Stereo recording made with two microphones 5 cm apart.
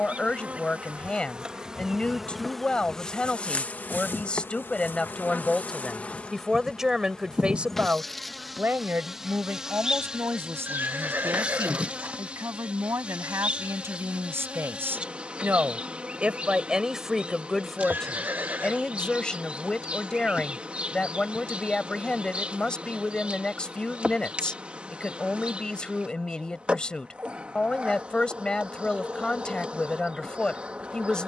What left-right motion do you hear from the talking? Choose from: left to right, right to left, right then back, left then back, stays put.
right then back.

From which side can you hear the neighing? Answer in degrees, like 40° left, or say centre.
40° right.